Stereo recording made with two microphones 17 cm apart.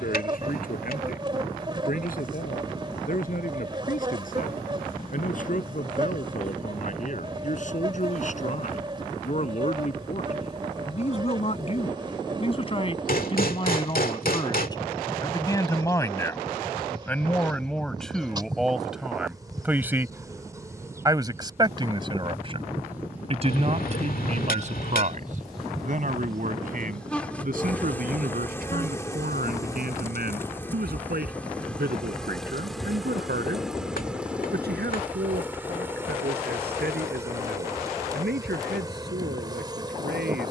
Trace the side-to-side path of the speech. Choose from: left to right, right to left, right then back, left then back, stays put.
left to right.